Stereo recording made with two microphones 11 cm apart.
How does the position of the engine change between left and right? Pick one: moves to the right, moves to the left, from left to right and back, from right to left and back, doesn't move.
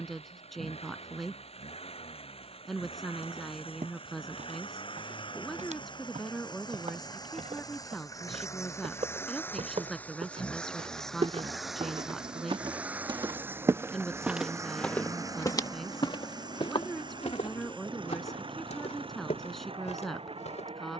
moves to the right.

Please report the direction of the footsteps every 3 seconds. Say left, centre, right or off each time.
off, right, right, right, right, left, left.